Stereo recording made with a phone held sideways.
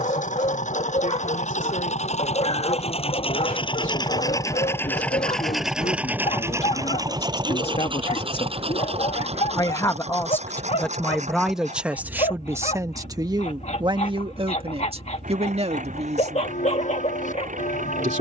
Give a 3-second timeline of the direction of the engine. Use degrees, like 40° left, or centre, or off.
60° left, 20° left, 30° right, 60° right, 60° right, 70° right.